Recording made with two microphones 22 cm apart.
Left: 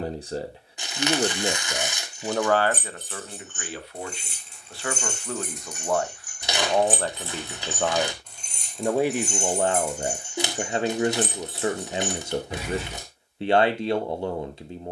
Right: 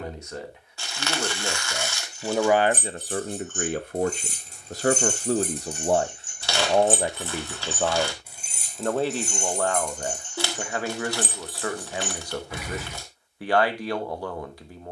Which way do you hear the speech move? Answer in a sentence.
In this clip you hear the speech go right and come back.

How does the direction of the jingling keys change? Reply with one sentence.
You can hear the jingling keys move from right to left.